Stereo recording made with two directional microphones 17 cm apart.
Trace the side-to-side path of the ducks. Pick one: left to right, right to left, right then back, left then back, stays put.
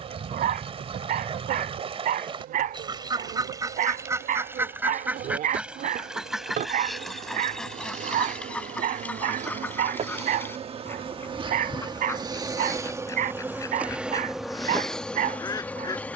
right to left.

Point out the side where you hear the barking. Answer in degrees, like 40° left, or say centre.
60° right.